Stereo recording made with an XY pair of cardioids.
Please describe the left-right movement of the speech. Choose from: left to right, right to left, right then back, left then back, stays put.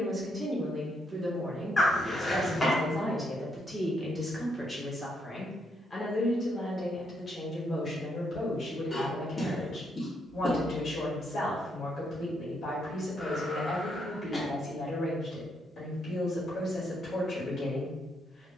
right to left.